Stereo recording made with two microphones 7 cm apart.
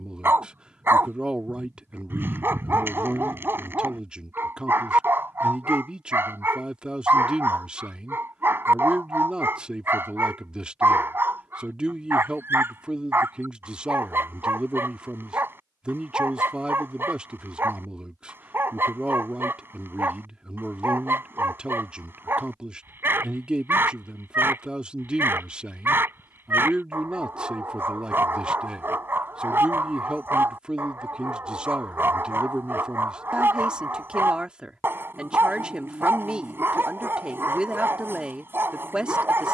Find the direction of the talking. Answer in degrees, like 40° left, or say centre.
10° right.